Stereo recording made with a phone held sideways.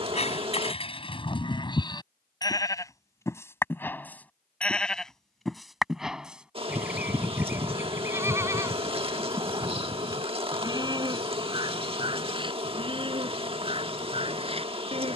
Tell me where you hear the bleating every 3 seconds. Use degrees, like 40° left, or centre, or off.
30° left, 10° left, 10° right, 20° right, 30° right.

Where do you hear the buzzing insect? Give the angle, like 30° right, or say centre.
30° right.